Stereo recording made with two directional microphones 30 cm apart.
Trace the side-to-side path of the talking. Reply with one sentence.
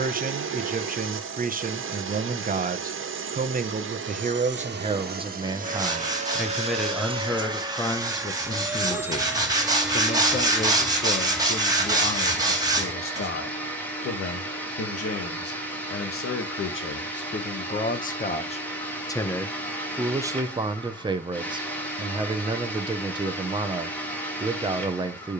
In this clip you hear the talking go left and come back.